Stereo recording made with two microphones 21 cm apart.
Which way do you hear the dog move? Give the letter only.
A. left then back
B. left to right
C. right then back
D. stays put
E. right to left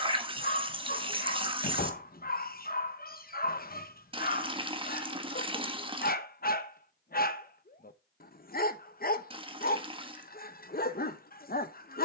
D.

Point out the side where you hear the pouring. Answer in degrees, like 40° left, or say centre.
20° right.